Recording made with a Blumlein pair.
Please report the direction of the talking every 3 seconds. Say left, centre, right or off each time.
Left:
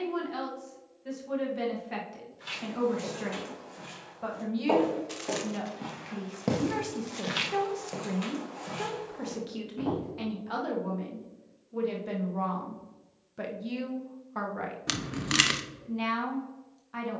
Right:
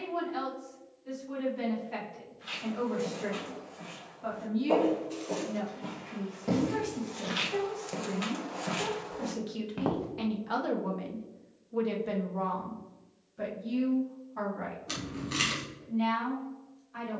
left, left, left, centre, left, left.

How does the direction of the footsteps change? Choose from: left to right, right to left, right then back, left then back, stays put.
left to right.